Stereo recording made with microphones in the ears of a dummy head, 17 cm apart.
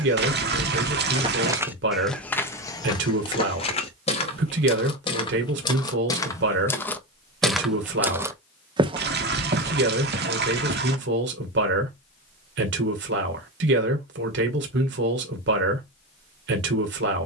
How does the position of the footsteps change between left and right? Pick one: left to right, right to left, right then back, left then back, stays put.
left then back.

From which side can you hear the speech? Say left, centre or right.
right.